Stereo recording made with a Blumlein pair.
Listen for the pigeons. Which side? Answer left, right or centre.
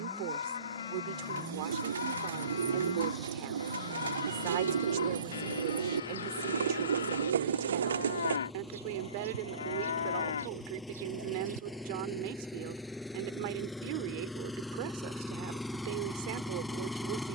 right.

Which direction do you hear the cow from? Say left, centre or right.
left.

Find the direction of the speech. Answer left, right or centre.
right.